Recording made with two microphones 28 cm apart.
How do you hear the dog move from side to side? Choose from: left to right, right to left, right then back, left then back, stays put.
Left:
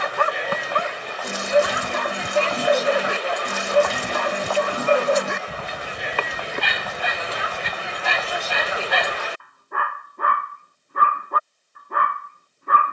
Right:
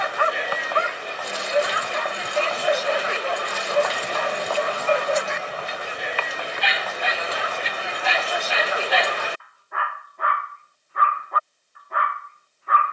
stays put.